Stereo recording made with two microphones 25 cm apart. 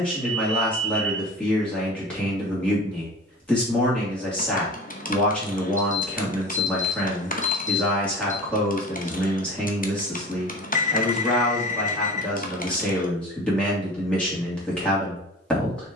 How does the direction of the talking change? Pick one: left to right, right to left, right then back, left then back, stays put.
stays put.